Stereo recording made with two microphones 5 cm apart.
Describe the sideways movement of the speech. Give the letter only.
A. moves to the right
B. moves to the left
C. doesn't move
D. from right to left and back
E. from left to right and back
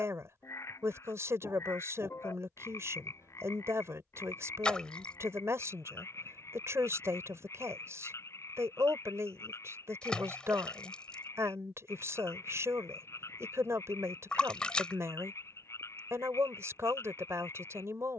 C.